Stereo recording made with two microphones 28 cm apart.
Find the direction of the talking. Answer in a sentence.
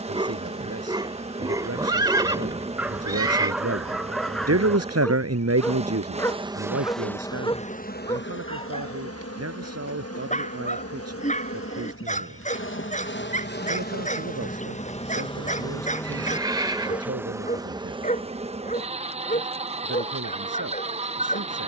You can hear the talking on the right.